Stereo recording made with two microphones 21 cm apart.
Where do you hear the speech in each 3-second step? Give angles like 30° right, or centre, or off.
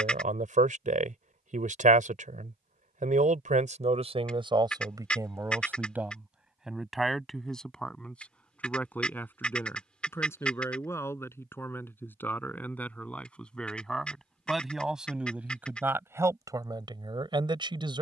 40° right, 20° right, centre, 10° left, centre, 10° right.